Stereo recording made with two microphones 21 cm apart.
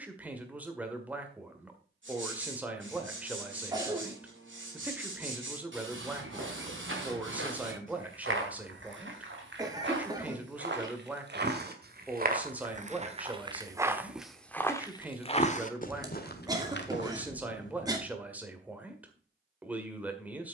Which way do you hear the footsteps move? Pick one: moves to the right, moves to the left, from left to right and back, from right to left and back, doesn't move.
moves to the left.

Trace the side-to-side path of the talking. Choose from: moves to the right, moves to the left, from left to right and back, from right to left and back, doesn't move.
doesn't move.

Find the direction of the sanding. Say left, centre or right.
right.